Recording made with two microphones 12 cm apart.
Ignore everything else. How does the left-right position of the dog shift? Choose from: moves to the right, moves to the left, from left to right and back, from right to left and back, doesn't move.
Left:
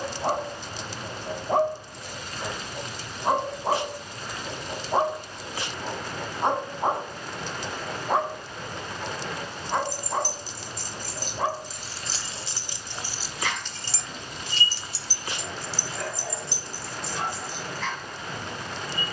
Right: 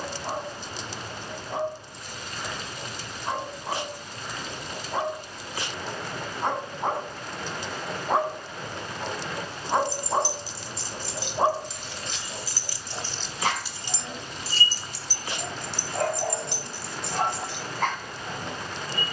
moves to the right.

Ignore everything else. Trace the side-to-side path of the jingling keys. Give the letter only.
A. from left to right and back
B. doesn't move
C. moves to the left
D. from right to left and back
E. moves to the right
E.